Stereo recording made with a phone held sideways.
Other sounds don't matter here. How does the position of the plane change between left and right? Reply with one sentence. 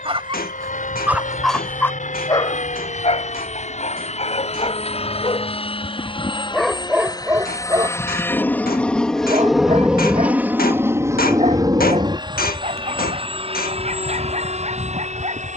You can hear the plane move to the right.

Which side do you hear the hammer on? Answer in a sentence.
In this clip you hear the hammer on the left.